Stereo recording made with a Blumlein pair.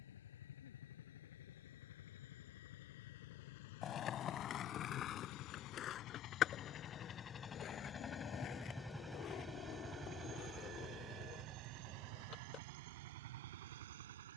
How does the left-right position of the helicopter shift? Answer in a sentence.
In this clip you hear the helicopter travel towards the right.